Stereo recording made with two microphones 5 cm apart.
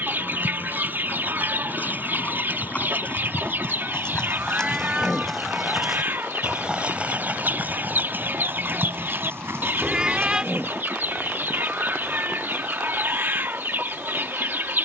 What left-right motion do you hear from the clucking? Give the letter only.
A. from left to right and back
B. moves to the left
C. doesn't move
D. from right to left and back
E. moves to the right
C.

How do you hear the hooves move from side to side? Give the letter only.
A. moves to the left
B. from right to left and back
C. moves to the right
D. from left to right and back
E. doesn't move
C.